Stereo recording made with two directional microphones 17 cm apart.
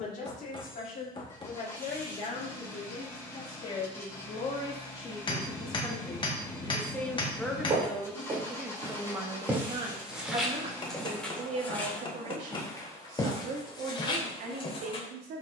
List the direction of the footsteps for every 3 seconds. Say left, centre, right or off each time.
off, off, right, centre, left.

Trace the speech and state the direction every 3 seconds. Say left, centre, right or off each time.
left, left, centre, right, right.